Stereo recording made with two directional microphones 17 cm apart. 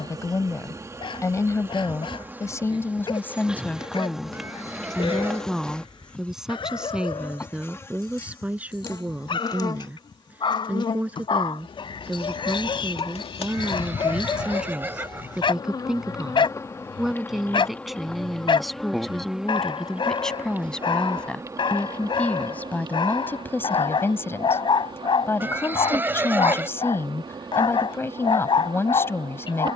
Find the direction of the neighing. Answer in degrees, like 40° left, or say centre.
10° right.